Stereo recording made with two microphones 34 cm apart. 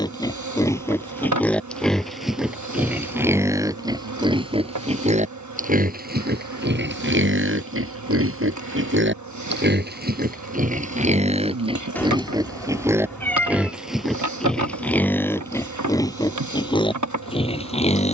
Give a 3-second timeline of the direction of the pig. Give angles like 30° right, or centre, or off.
centre, 10° right, 30° right, 20° right, centre, 10° left.